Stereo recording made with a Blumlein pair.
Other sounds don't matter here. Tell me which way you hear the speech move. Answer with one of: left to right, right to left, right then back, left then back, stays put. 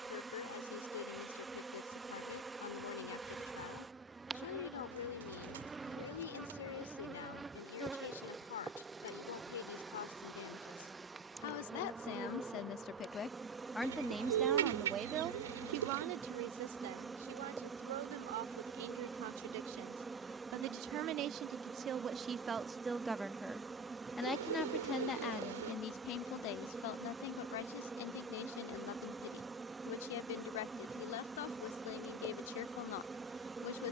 right then back.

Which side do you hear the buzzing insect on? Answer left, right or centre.
centre.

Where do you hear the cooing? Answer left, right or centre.
right.